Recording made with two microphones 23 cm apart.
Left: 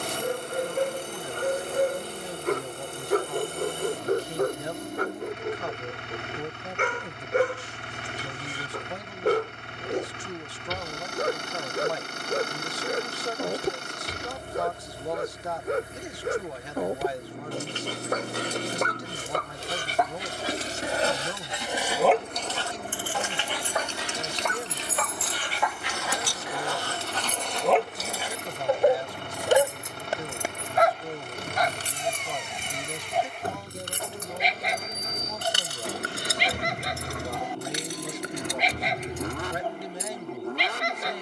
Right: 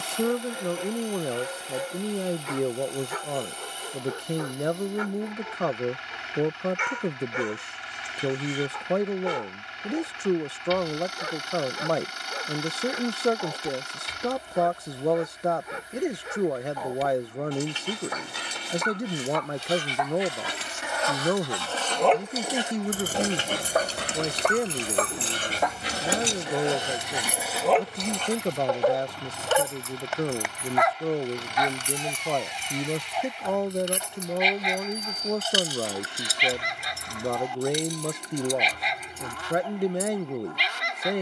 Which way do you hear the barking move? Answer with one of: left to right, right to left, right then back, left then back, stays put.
right then back.